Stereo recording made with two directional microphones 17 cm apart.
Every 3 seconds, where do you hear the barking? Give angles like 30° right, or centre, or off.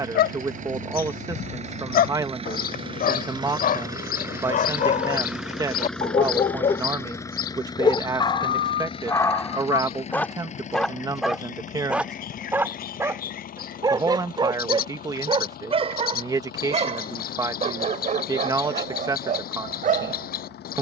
60° left, 50° left, 30° left, 10° left, 20° right, 40° right, 50° right.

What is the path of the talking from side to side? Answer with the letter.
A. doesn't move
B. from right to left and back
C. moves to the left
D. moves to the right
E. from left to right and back
A.